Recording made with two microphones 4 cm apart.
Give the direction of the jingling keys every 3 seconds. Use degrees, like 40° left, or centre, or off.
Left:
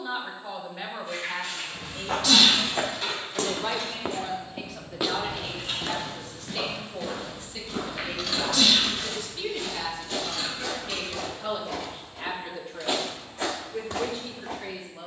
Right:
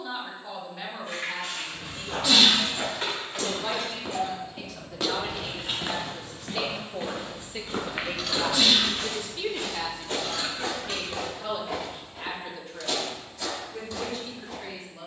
50° right, 30° right, 10° right, 40° right, off.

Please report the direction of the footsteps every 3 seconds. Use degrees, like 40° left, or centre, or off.
70° left, 20° left, 40° right, 40° right, 30° left.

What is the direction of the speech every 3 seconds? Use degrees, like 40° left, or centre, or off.
20° left, 10° left, 20° right, centre, 10° left.